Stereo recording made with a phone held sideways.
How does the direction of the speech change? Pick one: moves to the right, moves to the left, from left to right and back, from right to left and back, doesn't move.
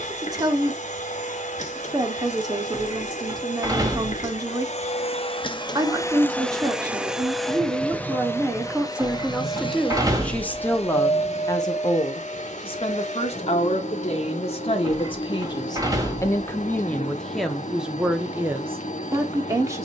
from right to left and back.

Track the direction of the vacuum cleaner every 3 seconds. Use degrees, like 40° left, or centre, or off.
60° left, 50° left, 10° left, 40° left, 60° left, 60° left, 60° left.